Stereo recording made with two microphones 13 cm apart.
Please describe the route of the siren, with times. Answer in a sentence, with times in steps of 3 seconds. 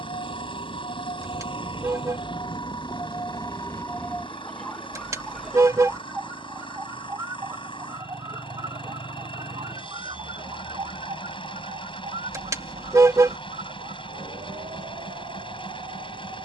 You can hear the siren on the left from 0 s, in the centre from 3 s and on the right from 6 s.